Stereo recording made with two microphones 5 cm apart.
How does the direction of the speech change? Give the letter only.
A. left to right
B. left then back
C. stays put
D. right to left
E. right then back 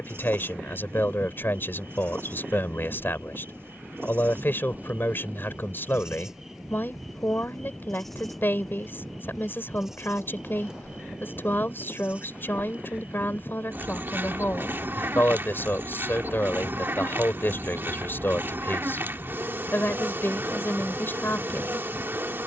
C.